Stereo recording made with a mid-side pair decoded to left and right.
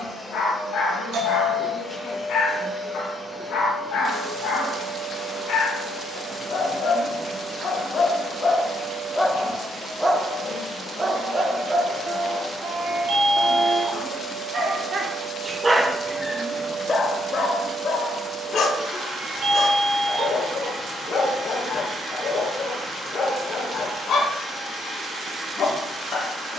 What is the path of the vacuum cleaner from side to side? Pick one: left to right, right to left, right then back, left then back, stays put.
left to right.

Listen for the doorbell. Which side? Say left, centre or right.
right.